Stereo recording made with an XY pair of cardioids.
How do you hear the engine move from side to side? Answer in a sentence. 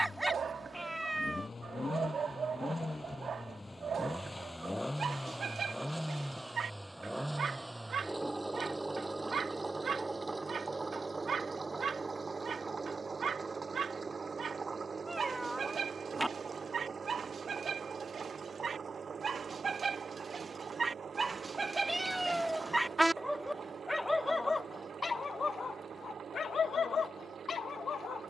You can hear the engine go from the left side to the right.